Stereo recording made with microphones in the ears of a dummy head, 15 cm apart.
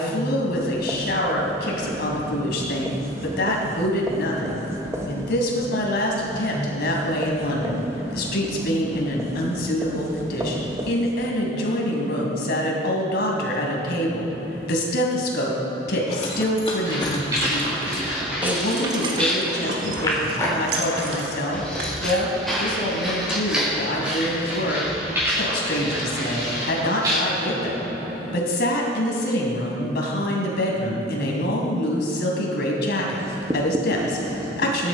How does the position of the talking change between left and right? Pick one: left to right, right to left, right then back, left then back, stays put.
stays put.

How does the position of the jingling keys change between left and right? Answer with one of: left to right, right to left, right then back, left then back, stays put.
left to right.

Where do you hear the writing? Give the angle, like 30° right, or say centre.
20° right.